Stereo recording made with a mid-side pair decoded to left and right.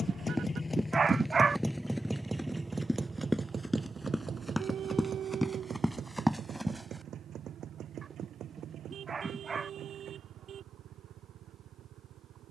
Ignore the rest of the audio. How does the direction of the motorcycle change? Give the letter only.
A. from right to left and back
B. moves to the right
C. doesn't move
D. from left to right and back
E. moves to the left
B.